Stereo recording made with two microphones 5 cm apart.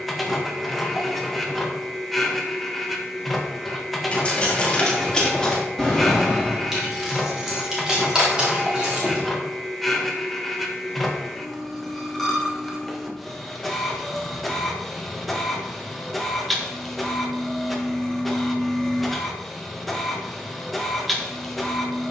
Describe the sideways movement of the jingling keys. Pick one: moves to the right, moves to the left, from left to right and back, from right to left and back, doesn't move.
moves to the right.